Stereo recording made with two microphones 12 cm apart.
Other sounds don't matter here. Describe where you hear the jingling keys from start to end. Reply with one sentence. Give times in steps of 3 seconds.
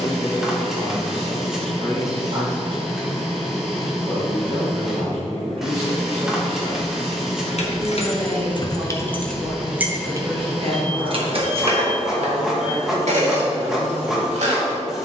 In this clip you hear the jingling keys not at all from 0 s, on the left from 6 s and on the right from 9 s.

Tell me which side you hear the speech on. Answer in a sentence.
In this clip you hear the speech on the right.